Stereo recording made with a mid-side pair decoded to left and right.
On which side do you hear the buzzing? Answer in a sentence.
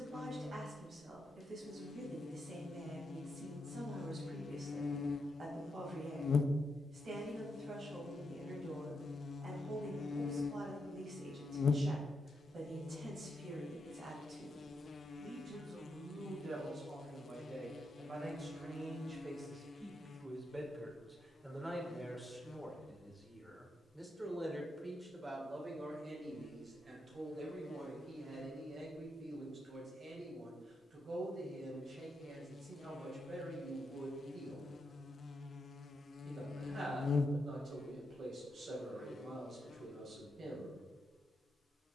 You can hear the buzzing on the left.